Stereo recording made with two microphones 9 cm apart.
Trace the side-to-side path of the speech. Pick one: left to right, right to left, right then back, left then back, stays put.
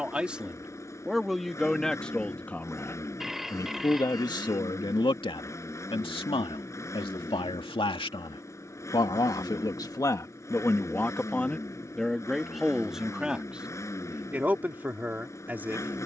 left then back.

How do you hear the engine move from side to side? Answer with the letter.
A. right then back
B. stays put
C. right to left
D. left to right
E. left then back
B.